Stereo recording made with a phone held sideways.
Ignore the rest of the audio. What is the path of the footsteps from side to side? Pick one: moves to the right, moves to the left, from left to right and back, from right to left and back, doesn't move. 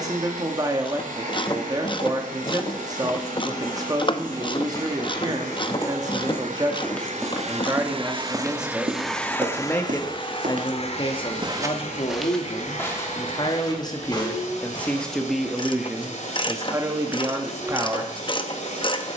from left to right and back.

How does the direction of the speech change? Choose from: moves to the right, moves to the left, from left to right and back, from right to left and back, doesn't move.
from right to left and back.